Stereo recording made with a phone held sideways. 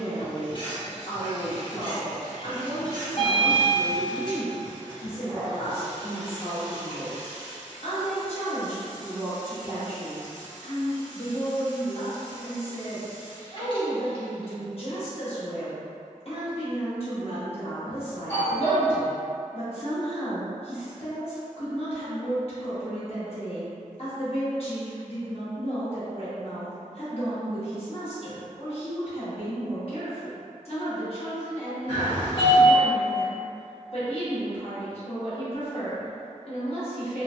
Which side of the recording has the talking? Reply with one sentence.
You can hear the talking on the left.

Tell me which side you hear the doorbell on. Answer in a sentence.
In this clip you hear the doorbell on the left.